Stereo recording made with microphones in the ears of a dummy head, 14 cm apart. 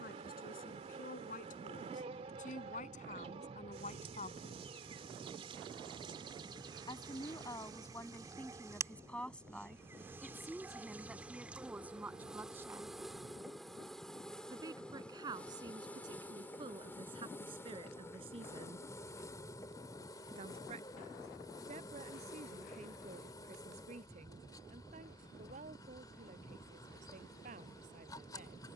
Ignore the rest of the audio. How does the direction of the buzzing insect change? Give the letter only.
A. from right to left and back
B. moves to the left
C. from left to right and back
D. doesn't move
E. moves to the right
B.